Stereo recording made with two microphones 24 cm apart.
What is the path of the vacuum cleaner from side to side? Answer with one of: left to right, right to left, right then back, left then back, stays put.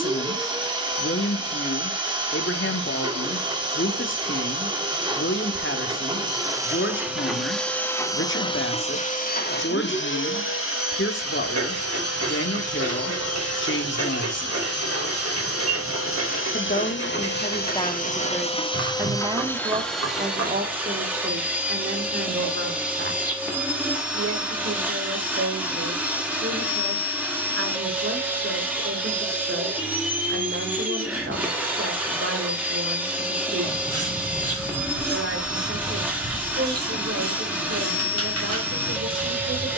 left then back.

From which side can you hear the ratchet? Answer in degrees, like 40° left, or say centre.
80° right.